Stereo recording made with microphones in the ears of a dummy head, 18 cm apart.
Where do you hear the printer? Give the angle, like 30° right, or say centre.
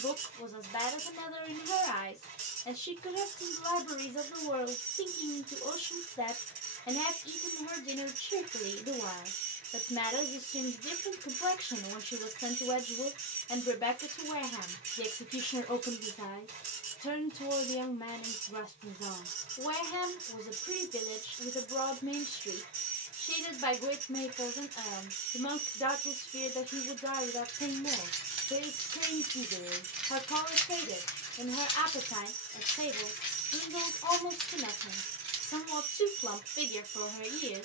40° right.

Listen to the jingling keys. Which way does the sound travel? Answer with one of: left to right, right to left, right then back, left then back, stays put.
left then back.